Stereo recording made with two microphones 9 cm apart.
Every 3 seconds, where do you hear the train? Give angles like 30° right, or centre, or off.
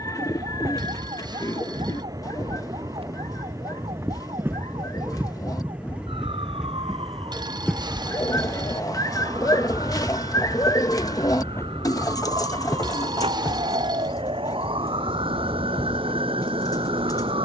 40° right, 20° right, centre, 20° left, 40° left, 40° left.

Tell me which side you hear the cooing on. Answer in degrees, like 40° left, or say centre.
40° left.